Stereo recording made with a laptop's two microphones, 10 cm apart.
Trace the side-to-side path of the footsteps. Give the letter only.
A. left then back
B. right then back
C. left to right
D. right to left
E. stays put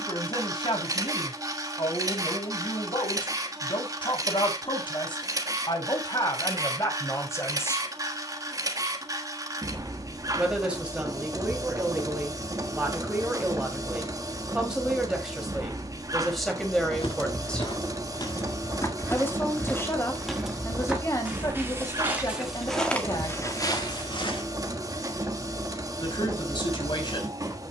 B.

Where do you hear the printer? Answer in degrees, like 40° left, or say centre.
30° right.